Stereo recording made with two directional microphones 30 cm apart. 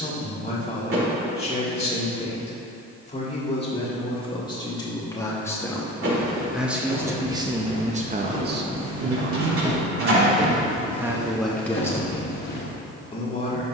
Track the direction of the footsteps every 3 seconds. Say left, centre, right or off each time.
off, off, right, centre, left.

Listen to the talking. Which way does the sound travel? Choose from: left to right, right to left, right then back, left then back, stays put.
right then back.